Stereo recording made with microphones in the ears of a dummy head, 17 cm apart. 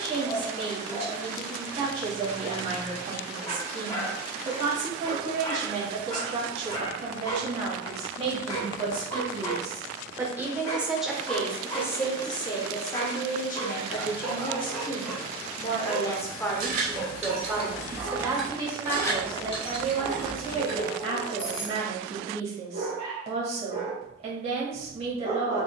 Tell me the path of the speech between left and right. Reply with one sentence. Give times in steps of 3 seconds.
You can hear the speech on the right from 0 s, in the centre from 9 s, on the left from 12 s, in the centre from 15 s and on the right from 18 s.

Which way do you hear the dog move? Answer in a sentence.
In this clip you hear the dog move to the right.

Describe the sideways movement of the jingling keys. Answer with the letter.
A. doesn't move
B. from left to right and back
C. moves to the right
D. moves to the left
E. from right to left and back
D.